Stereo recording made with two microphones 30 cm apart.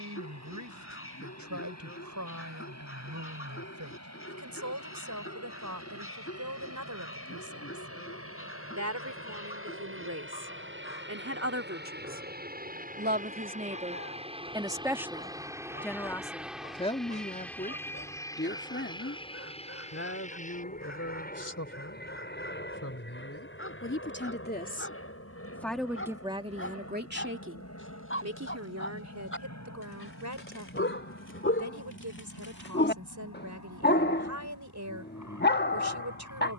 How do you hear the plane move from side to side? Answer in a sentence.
In this clip you hear the plane move from right to left.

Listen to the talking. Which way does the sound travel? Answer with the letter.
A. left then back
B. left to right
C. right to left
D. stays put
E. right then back
A.